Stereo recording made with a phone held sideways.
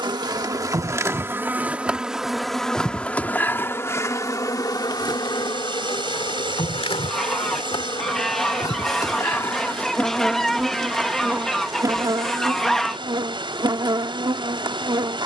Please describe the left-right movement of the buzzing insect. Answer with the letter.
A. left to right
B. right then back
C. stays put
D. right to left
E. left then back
E.